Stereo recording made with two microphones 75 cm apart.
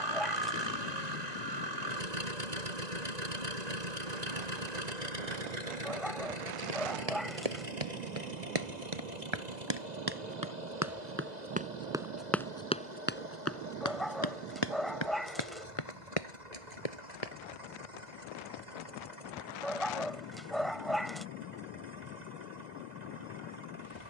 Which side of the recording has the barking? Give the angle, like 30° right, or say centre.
centre.